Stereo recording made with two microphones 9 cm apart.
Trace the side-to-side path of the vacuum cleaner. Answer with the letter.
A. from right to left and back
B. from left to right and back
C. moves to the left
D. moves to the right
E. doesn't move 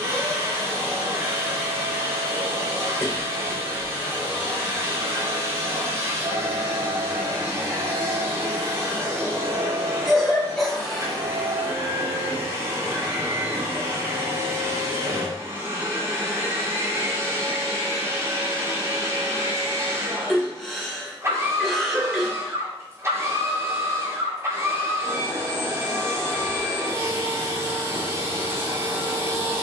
E.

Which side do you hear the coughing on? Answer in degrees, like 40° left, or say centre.
centre.